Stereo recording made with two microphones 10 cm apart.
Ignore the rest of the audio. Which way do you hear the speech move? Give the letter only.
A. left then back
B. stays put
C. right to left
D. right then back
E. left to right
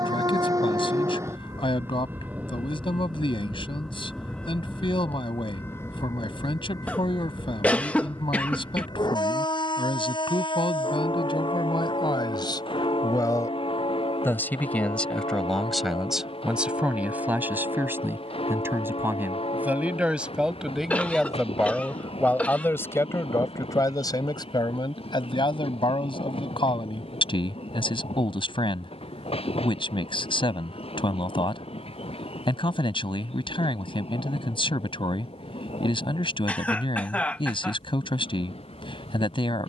D.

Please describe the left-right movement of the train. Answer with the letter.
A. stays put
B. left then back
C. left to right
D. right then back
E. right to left
E.